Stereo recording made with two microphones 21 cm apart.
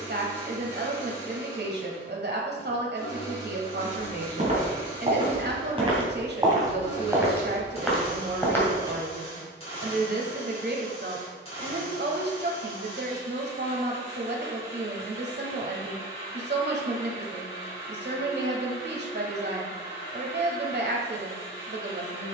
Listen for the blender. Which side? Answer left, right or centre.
left.